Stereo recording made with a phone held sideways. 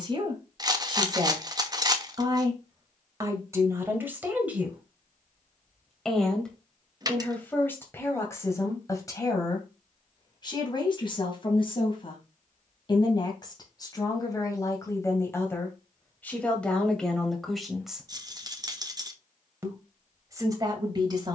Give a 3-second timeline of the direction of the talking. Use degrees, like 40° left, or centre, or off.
30° right, 10° right, 10° left, 30° left, 30° left, 10° left, 20° right.